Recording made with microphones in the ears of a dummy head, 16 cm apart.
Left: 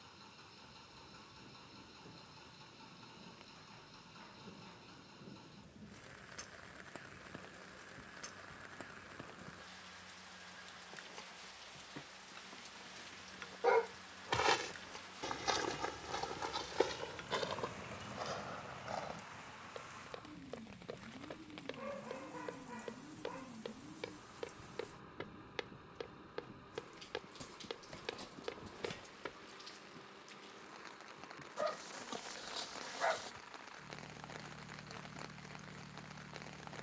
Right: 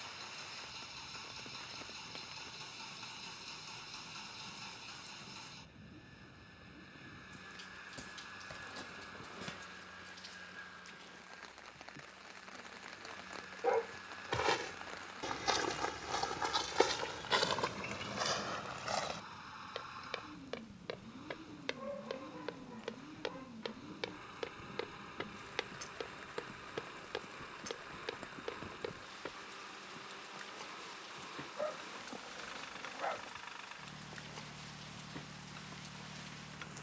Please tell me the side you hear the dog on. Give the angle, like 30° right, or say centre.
80° left.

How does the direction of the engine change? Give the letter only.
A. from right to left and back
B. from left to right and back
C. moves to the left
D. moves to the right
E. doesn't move
E.